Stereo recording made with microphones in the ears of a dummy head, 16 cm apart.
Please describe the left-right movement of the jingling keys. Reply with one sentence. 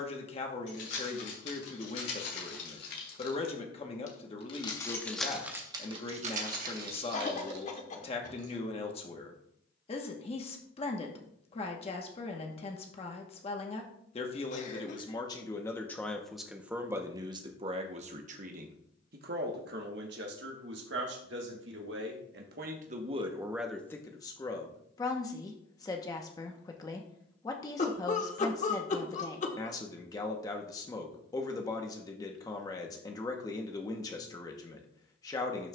You can hear the jingling keys move from left to right.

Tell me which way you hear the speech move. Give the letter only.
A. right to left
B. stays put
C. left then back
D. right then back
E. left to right
D.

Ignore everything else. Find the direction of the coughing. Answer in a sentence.
You can hear the coughing on the left.